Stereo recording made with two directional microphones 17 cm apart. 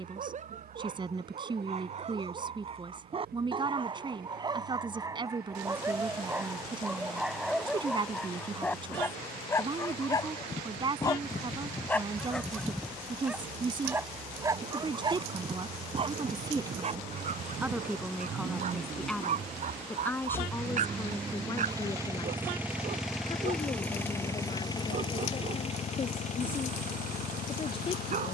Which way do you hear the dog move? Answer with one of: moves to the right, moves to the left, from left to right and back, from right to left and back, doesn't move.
from right to left and back.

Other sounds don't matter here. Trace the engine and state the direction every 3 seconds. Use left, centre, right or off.
right, right, right, right, right, right, right, centre, left, left.